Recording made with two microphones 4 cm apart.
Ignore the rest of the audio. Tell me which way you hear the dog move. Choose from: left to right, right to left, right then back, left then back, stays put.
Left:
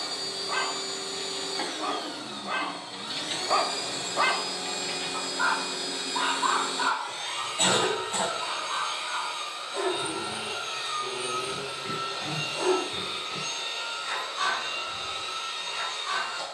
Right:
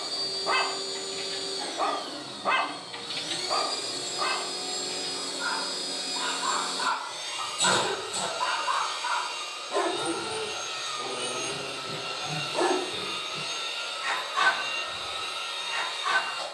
left then back.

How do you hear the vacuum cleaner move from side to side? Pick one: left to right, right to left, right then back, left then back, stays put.
left to right.